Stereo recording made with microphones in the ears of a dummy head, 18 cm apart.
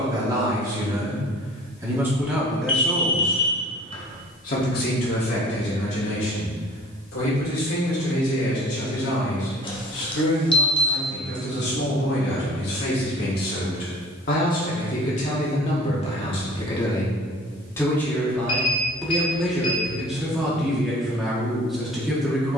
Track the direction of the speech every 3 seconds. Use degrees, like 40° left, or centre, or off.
10° right, 40° left, 70° left, 60° left, 50° left, 30° left, centre, centre.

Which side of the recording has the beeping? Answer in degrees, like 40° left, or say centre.
30° left.